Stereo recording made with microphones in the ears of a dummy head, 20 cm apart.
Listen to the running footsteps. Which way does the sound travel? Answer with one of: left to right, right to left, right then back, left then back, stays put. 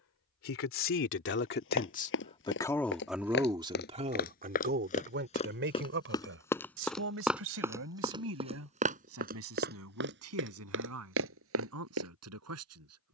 left to right.